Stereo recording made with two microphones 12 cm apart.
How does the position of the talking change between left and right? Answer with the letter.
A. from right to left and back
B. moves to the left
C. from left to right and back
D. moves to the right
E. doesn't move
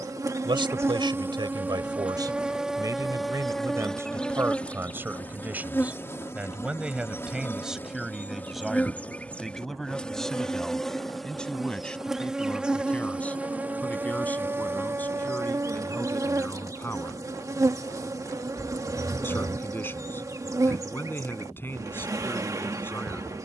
B.